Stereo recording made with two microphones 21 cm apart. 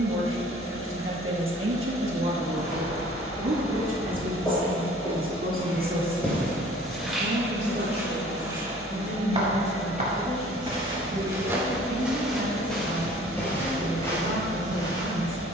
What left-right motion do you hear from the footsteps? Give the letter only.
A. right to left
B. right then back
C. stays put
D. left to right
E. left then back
B.